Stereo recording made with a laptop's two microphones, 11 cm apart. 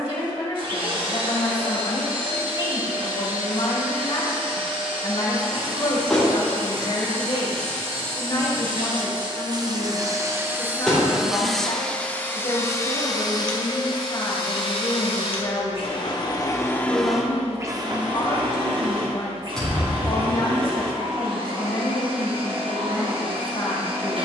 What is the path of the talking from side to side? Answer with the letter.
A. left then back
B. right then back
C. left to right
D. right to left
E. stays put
E.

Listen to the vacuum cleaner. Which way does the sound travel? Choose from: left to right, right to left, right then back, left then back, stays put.
left then back.